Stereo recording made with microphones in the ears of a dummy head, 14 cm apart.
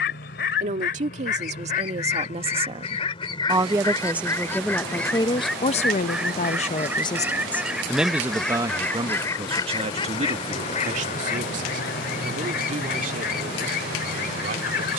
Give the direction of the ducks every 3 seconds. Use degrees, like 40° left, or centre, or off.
50° left, 10° left, centre, 40° left, 60° left.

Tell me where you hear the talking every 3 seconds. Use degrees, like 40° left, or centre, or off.
40° right, 10° left, 10° left, 40° right, 50° right.